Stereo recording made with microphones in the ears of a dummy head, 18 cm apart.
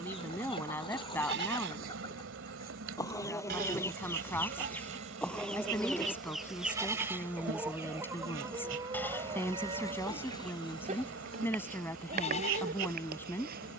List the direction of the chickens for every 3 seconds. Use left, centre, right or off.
left, centre, centre, right, right.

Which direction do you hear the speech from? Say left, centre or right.
centre.